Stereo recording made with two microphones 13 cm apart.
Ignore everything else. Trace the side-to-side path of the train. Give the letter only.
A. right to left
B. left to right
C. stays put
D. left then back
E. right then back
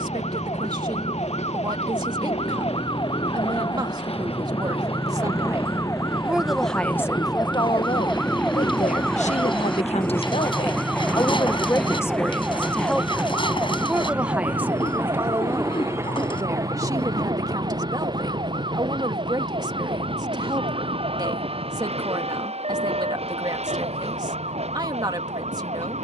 B.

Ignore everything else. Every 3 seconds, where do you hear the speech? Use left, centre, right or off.
right, right, left, left, centre, right, right, right, right.